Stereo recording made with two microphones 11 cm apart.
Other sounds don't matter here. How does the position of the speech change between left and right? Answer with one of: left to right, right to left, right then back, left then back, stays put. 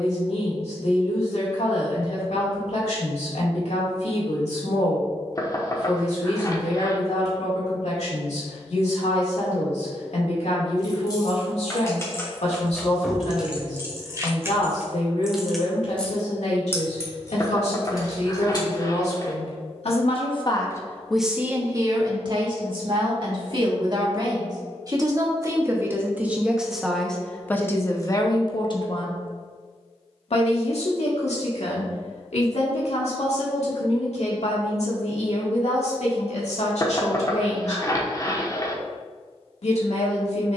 right then back.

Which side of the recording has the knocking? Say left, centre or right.
left.